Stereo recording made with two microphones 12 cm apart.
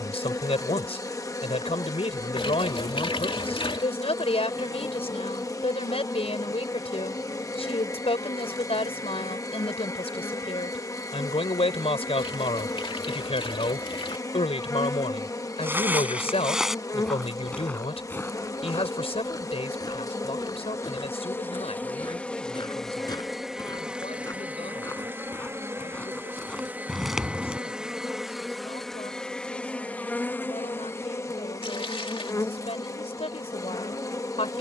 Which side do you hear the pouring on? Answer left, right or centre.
left.